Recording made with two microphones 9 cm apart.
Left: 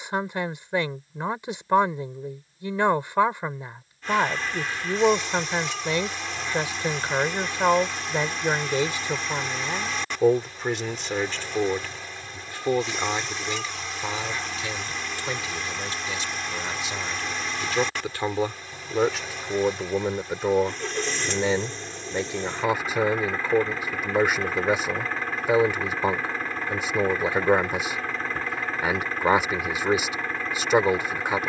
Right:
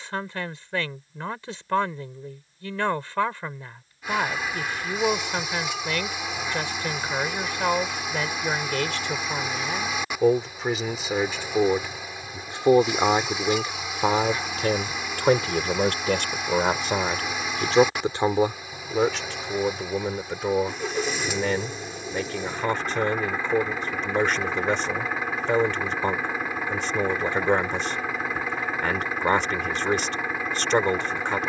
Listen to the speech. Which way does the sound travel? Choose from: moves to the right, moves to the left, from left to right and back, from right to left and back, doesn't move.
from left to right and back.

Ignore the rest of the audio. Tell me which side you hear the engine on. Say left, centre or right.
centre.